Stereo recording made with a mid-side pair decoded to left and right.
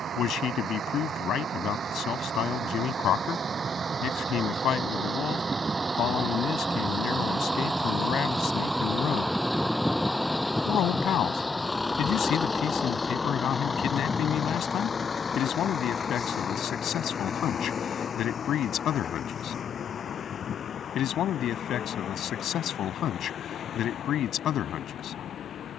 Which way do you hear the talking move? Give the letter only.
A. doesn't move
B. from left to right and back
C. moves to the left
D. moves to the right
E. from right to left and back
A.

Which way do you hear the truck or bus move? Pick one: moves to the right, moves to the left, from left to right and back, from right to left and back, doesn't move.
moves to the left.